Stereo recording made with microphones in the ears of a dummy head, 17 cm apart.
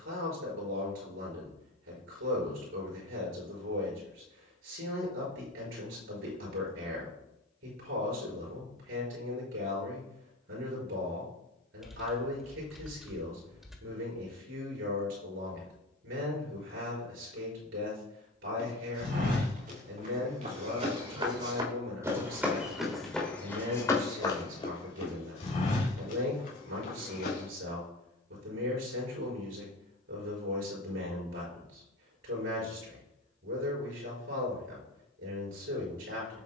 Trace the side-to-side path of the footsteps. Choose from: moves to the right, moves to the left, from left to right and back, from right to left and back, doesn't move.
moves to the left.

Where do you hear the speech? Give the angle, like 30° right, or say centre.
70° right.